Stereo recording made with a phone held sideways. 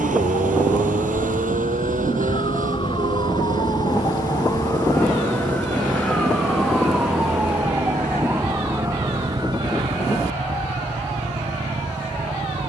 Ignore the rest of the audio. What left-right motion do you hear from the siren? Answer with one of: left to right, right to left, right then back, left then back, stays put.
left to right.